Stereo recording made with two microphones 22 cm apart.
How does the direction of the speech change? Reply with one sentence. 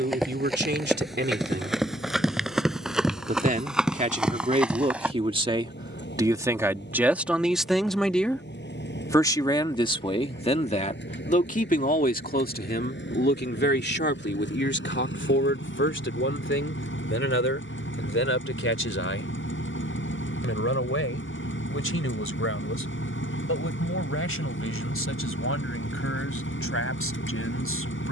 You can hear the speech move to the left.